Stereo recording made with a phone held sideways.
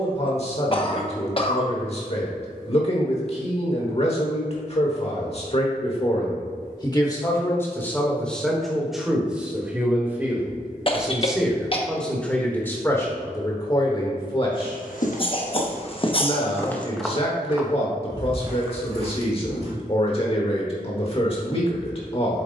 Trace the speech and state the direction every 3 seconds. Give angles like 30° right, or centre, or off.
40° left, 40° left, 20° left, 10° right, 20° left, 40° left, 40° left, 40° left.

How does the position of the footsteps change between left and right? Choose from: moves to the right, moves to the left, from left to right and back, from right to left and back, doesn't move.
moves to the right.